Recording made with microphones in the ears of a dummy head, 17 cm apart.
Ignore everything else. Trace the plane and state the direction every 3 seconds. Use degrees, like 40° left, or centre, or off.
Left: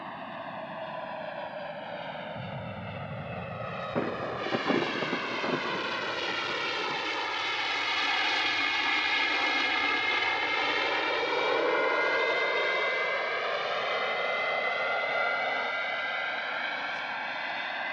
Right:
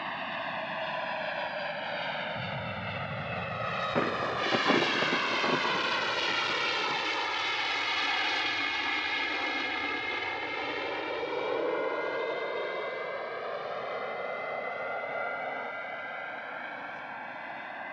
50° right, 30° right, centre, 30° left, 60° left, 70° left.